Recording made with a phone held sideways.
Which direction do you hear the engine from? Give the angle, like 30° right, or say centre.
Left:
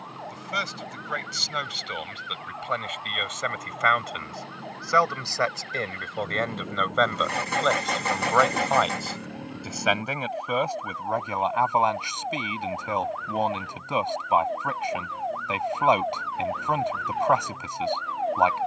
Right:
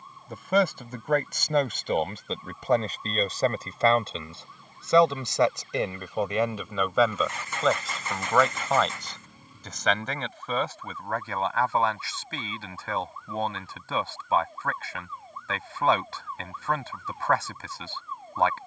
60° left.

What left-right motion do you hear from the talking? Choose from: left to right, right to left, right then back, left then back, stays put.
right to left.